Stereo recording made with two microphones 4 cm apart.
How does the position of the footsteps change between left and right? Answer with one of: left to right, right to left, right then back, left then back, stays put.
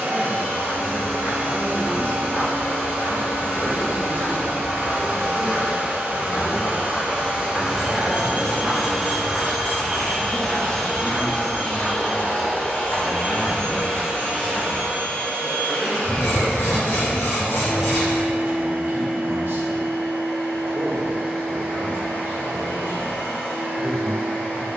right then back.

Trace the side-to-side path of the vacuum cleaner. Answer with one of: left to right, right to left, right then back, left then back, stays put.
right to left.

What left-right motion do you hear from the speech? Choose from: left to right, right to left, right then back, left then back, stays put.
left then back.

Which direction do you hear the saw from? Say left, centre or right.
left.